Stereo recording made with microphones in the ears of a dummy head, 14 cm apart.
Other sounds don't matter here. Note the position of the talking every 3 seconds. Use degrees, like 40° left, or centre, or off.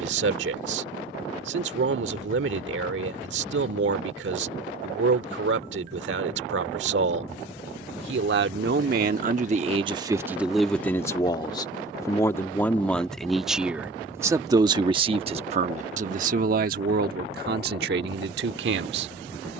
80° right, 80° right, 70° right, 10° right, centre, 50° right, 70° right.